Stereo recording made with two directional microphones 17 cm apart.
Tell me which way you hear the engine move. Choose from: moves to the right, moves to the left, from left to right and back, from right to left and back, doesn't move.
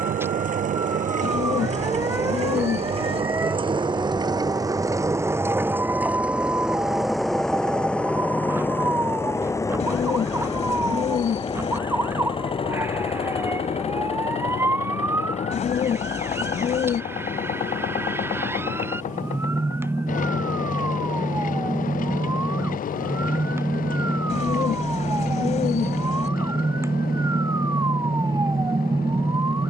moves to the left.